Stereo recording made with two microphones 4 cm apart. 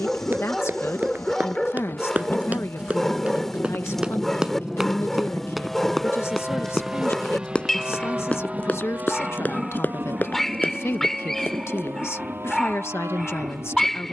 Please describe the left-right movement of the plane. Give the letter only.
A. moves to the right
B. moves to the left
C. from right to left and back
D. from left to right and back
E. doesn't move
A.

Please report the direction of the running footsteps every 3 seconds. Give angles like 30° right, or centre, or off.
40° right, 20° right, 20° left, 40° left, off.